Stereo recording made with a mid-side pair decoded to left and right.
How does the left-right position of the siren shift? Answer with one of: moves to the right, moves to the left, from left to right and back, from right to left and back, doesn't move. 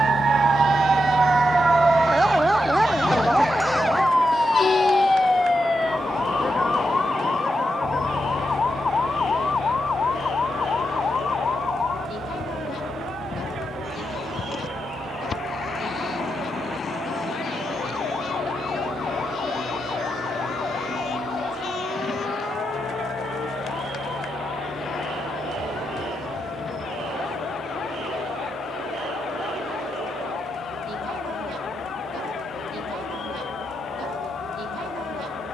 moves to the left.